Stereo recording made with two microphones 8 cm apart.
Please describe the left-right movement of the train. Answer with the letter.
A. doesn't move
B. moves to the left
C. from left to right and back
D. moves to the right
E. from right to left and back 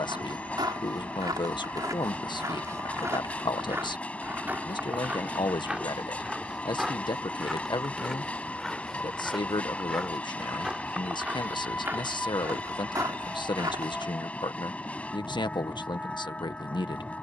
A.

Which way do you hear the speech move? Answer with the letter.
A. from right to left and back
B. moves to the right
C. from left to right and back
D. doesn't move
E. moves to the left
D.